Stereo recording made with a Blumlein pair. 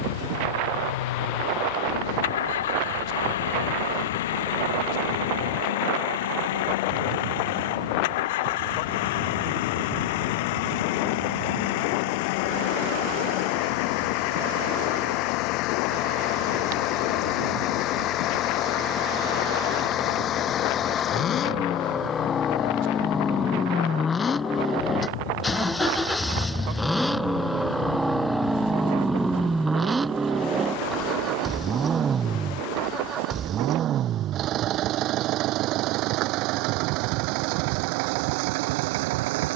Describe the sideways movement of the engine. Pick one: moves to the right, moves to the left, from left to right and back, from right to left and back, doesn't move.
moves to the right.